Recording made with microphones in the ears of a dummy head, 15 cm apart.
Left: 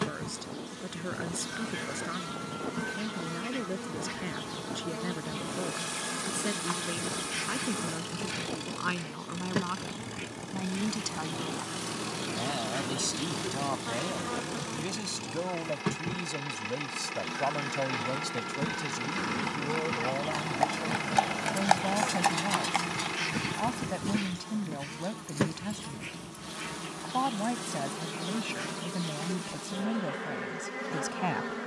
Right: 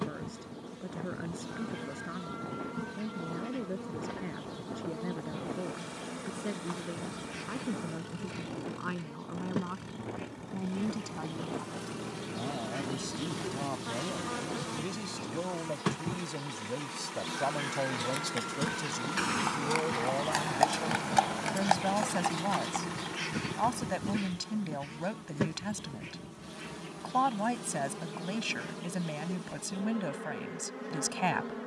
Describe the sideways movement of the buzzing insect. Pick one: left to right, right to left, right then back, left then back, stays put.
right then back.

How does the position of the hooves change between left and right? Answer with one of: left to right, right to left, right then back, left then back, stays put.
right to left.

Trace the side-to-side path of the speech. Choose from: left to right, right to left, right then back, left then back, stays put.
left to right.